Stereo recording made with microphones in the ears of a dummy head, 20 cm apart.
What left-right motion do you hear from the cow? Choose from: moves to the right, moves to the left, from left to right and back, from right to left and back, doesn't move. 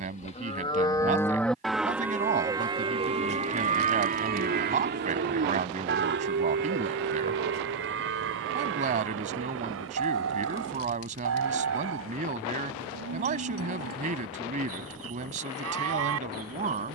moves to the right.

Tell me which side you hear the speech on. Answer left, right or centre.
right.